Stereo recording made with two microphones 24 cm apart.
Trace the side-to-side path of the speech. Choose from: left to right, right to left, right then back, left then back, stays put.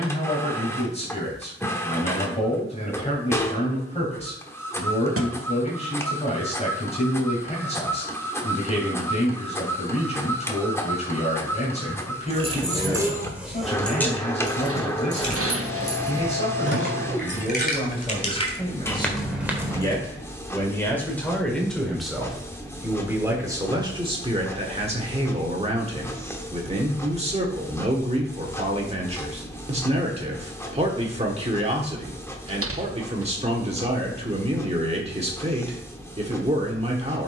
left to right.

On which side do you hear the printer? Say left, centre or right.
centre.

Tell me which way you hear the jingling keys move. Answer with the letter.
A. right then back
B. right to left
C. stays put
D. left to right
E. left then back
E.